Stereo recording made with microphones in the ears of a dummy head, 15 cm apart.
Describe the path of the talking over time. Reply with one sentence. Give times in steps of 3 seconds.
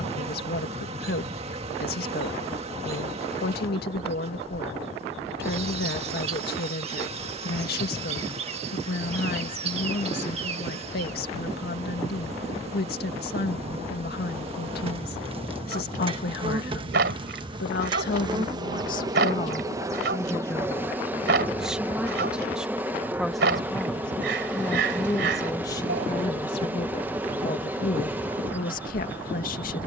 You can hear the talking on the left from 0 s, in the centre from 21 s and on the left from 24 s.